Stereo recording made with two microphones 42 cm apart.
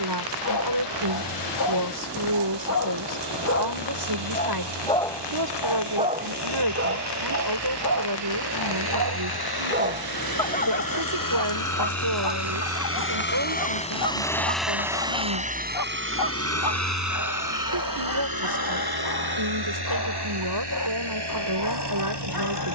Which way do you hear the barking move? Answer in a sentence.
In this clip you hear the barking go right and come back.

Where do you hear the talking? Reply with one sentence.
In this clip you hear the talking on the right.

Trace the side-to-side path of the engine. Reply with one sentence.
You can hear the engine go from the left side to the right.